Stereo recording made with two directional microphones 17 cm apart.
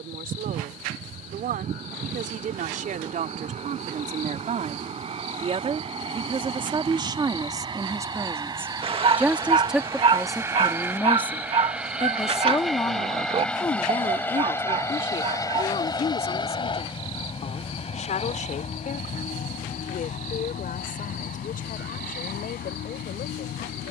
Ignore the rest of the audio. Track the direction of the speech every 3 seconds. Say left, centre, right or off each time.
right, right, right, centre, left, left, left, left.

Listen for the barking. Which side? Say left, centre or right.
right.